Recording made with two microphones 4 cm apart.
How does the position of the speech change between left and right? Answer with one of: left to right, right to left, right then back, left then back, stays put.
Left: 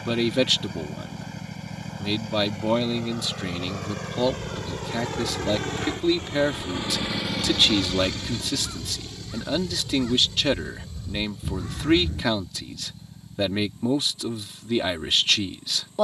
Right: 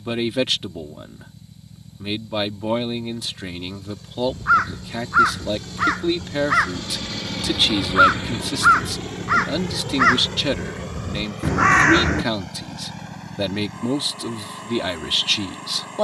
stays put.